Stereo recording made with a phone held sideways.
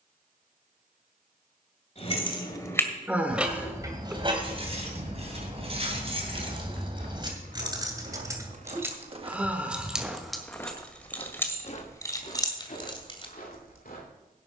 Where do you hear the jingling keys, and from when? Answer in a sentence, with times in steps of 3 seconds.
In this clip you hear the jingling keys on the left from 0 s, on the right from 3 s, in the centre from 9 s and on the left from 12 s.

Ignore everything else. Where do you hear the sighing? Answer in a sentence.
In this clip you hear the sighing in the centre.